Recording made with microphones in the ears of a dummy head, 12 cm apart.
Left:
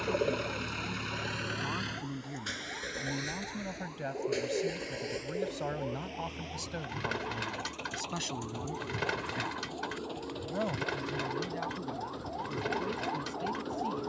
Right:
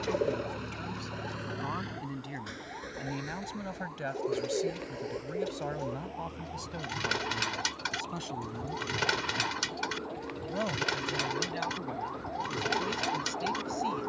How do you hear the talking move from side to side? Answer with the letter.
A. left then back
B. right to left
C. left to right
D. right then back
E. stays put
A.